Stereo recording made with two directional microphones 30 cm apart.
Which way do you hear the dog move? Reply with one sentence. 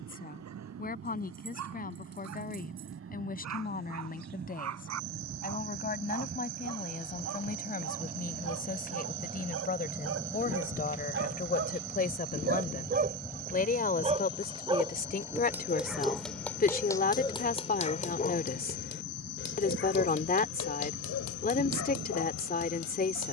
You can hear the dog move to the left.